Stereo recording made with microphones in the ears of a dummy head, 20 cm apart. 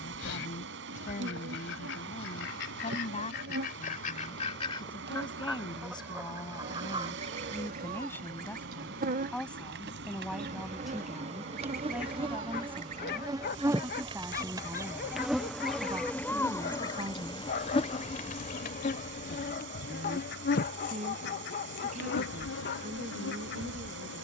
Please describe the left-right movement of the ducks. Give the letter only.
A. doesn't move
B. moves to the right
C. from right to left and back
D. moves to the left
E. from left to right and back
E.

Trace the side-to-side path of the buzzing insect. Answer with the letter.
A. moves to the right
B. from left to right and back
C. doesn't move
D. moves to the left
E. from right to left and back
D.